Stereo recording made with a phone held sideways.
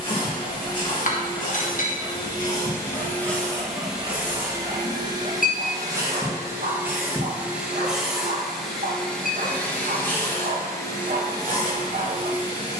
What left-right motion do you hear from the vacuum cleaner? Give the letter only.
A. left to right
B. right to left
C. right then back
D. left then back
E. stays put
C.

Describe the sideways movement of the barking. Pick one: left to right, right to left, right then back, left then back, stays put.
left to right.